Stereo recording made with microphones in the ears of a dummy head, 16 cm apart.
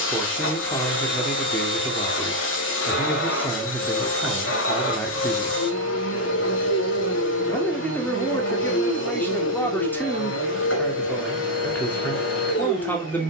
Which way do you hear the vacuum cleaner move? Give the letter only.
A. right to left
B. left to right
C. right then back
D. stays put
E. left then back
D.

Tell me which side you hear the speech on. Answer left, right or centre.
centre.